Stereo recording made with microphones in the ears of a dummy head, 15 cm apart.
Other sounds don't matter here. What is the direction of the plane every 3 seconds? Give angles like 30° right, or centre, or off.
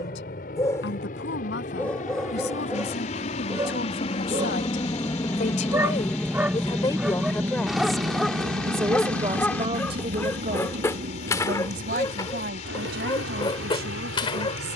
50° left, 30° left, 10° right, 50° right, 70° right.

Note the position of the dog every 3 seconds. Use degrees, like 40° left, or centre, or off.
10° left, 20° right, centre, 10° left, 30° left.